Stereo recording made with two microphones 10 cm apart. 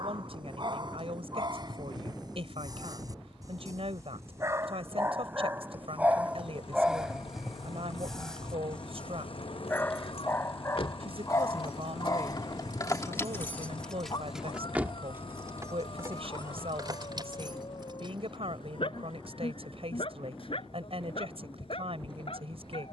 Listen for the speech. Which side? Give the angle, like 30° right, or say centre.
70° right.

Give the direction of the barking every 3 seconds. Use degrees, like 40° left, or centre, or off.
50° right, 30° right, centre, 30° left, 40° left, 60° left, 60° left, 70° left.